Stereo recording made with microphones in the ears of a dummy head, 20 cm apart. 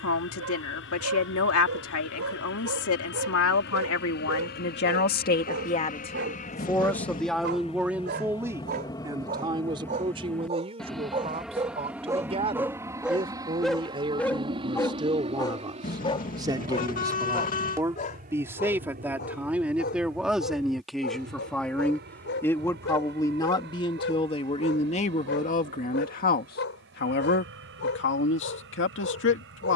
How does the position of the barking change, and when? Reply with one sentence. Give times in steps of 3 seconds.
You can hear the barking on the right from 0 s, in the centre from 12 s and on the left from 15 s.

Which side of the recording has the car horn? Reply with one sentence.
In this clip you hear the car horn on the left.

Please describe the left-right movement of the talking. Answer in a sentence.
You can hear the talking go right and come back.